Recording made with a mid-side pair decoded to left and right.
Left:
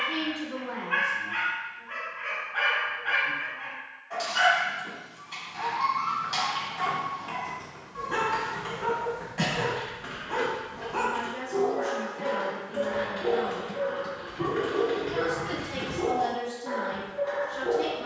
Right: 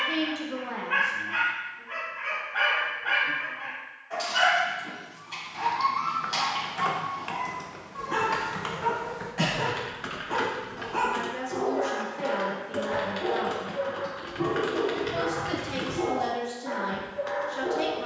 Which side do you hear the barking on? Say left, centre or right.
centre.